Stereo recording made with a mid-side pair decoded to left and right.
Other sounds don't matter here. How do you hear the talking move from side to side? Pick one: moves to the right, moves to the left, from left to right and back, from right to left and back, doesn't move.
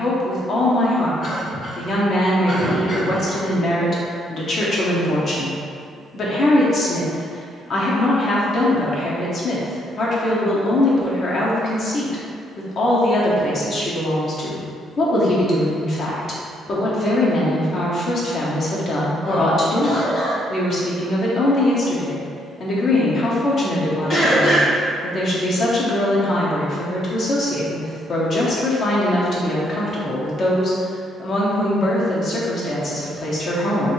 doesn't move.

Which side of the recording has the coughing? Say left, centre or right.
left.